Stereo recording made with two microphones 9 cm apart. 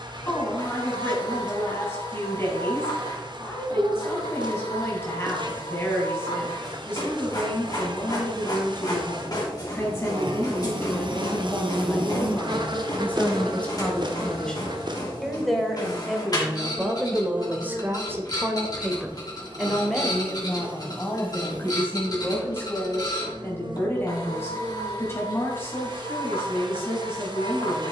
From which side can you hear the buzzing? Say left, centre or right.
right.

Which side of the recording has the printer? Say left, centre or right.
left.